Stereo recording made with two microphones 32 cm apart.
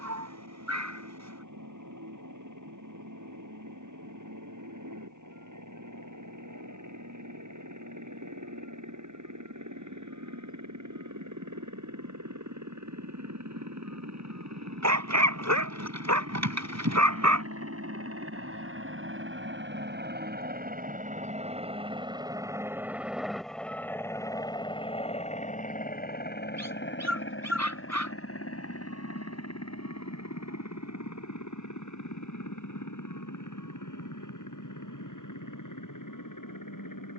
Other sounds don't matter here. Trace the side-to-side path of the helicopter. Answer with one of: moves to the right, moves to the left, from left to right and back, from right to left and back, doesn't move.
moves to the left.